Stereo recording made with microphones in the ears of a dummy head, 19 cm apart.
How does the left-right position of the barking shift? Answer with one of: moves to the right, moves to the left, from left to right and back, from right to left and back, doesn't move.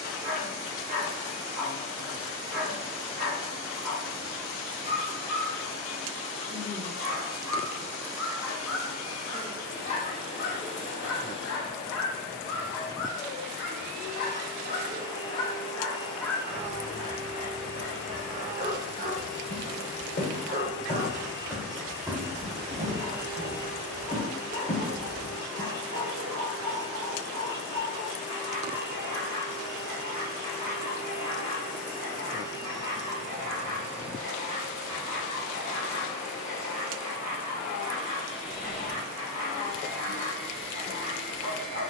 from right to left and back.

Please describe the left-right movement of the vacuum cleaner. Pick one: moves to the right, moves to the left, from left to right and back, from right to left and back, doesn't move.
doesn't move.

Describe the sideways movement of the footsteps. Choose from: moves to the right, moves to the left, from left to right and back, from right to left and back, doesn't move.
from left to right and back.